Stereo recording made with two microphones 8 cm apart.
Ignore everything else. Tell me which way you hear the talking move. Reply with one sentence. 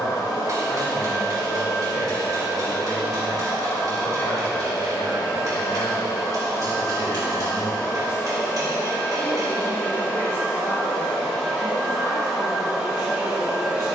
You can hear the talking stay put.